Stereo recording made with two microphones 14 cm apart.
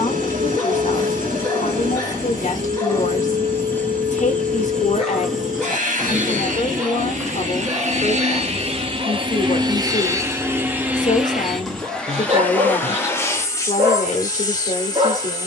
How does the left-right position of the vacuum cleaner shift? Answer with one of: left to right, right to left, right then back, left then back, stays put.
right to left.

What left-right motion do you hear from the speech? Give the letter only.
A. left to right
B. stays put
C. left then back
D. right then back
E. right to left
B.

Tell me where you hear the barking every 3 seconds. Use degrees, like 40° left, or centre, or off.
30° left, 10° left, 20° right, 40° right, 40° right.